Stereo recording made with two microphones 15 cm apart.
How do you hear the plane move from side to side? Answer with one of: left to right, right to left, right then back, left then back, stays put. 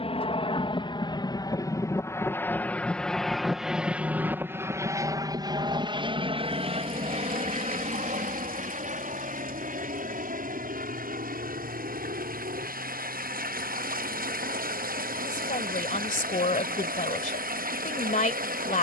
left to right.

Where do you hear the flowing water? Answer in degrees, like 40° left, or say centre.
70° right.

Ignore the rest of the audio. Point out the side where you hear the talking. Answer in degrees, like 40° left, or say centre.
60° left.